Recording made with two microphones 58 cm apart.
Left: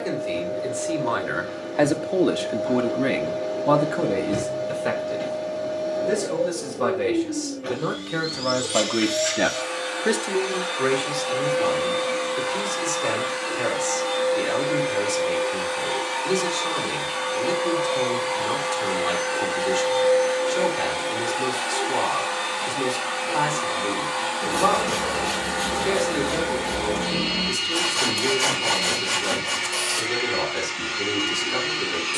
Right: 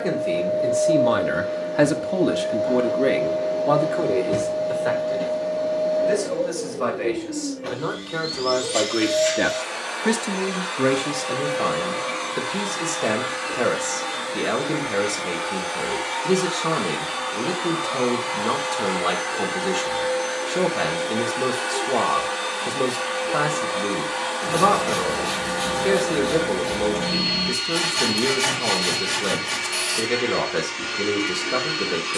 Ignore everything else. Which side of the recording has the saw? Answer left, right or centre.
centre.